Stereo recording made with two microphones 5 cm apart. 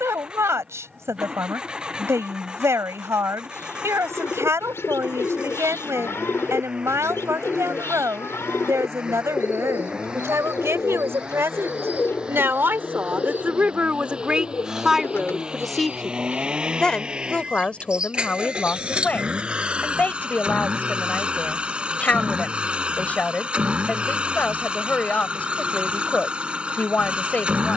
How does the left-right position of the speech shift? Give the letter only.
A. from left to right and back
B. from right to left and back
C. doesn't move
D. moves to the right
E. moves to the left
E.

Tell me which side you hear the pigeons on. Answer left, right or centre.
left.